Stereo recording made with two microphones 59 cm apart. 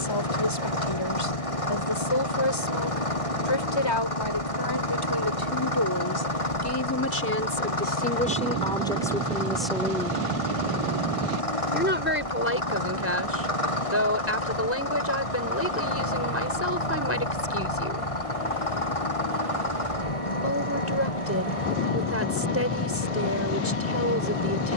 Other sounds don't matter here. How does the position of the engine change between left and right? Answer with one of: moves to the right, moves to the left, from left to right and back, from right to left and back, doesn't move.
doesn't move.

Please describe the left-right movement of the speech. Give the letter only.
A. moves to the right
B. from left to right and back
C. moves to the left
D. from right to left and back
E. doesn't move
A.